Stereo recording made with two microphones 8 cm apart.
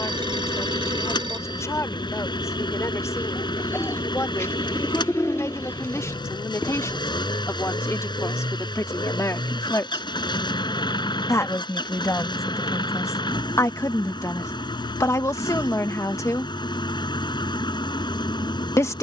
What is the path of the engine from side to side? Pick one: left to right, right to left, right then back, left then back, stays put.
stays put.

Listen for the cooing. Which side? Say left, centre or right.
left.